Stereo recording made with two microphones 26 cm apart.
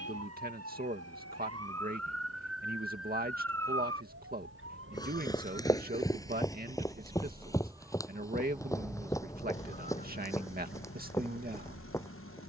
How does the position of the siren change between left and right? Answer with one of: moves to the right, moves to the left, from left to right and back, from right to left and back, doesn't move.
moves to the left.